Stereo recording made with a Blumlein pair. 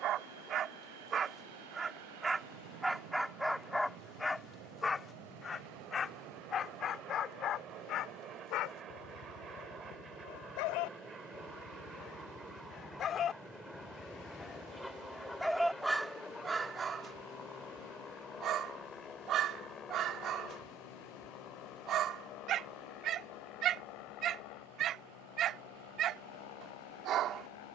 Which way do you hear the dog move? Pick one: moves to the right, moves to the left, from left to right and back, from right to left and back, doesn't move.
from right to left and back.